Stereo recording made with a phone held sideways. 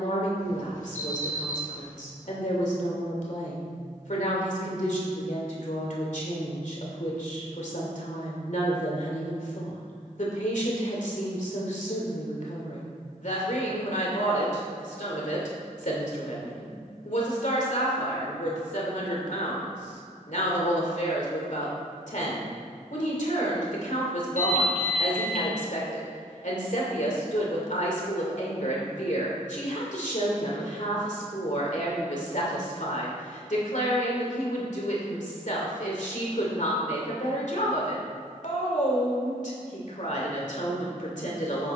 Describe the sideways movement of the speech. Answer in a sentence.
You can hear the speech stay in one place.